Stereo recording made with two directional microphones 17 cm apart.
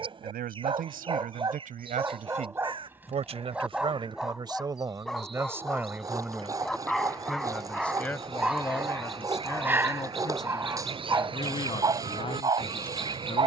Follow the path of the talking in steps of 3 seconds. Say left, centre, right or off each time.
right, right, centre, left, left.